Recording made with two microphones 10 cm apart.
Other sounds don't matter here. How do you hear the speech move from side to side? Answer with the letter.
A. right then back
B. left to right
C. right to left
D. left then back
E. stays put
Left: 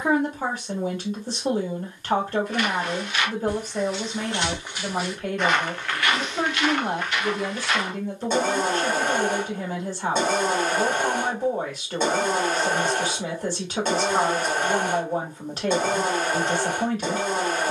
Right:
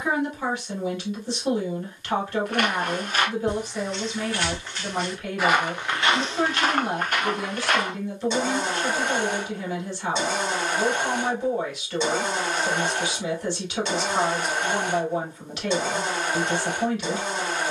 E.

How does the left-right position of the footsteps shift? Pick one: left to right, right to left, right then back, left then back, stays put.
left then back.